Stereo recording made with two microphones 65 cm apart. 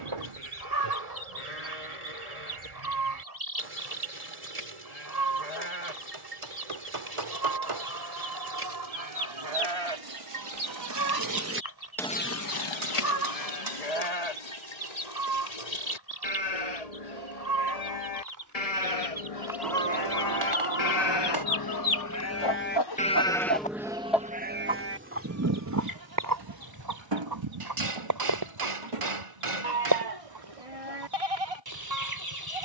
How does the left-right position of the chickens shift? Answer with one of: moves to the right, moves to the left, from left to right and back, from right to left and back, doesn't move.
from right to left and back.